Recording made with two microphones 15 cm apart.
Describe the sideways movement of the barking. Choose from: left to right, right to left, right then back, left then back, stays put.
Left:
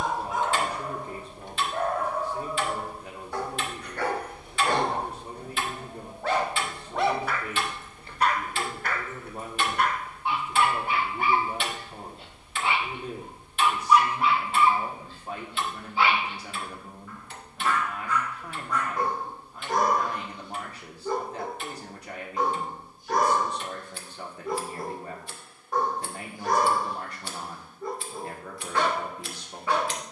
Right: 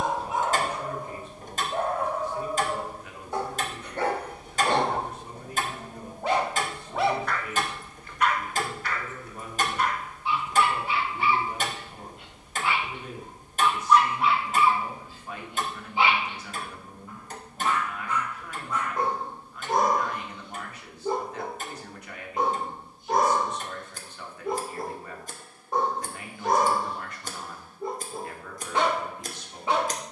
left then back.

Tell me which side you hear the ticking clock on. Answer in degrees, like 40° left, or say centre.
40° right.